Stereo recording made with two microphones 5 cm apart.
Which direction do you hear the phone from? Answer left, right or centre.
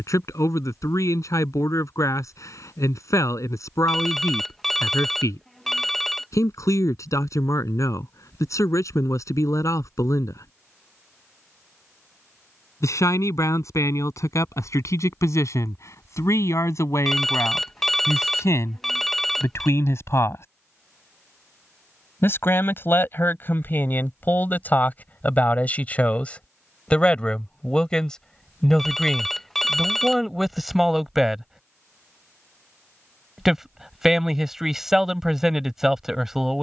centre.